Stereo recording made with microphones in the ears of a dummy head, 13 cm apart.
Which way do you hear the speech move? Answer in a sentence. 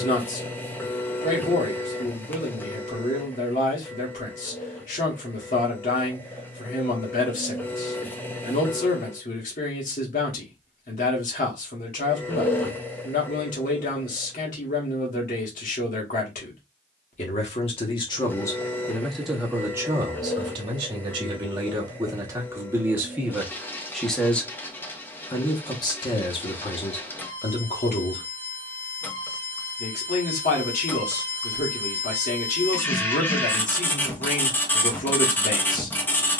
In this clip you hear the speech go right and come back.